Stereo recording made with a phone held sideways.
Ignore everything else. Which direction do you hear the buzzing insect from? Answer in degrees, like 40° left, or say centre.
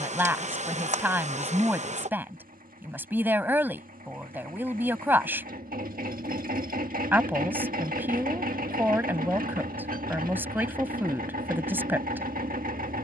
50° right.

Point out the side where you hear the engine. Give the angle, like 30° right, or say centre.
70° right.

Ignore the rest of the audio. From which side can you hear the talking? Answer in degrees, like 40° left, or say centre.
10° right.